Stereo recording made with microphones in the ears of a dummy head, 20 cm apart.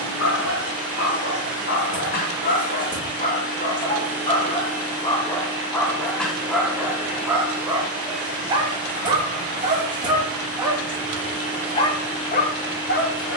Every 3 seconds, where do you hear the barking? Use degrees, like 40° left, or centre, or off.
50° left, 20° left, 10° right, 10° right, 40° left.